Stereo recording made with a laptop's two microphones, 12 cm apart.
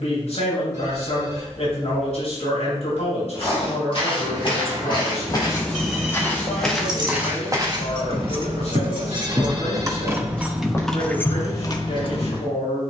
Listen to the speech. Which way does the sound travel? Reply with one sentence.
You can hear the speech stay put.